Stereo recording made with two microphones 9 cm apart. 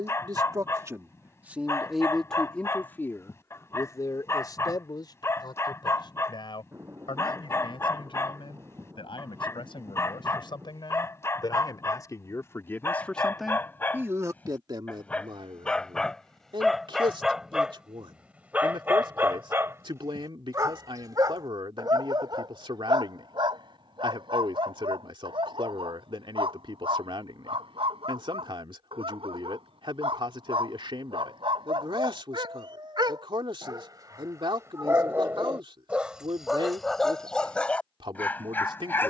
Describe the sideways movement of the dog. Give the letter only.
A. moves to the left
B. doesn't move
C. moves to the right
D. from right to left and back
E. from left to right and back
E.